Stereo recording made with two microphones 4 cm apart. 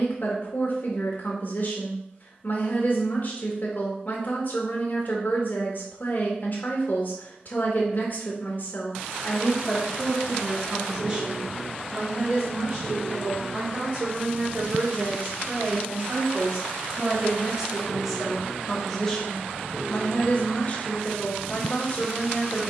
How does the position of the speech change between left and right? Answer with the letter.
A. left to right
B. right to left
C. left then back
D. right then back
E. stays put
D.